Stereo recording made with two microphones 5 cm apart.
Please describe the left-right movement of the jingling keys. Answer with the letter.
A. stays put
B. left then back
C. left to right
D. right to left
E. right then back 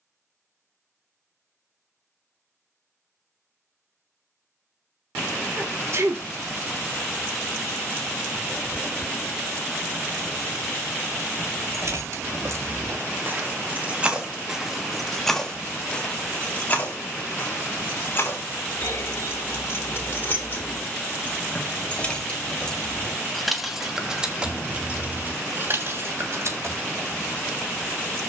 B.